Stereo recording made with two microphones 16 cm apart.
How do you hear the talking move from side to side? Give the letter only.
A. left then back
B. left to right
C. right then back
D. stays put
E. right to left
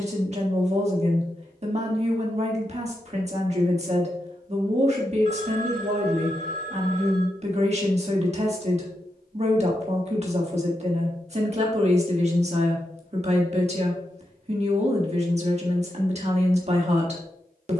D.